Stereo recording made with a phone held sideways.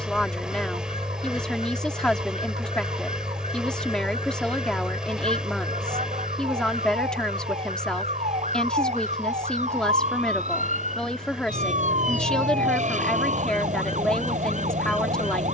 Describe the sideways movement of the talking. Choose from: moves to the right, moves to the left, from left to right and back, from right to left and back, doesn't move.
doesn't move.